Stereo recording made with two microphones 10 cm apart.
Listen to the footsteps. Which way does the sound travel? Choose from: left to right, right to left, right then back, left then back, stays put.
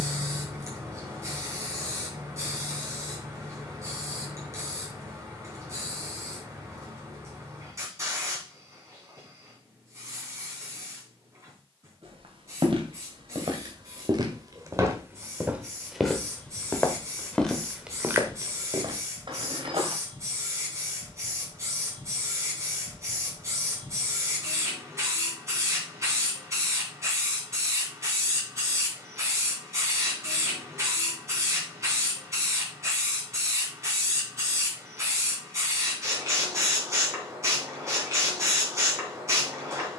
left then back.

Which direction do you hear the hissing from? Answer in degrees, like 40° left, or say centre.
30° right.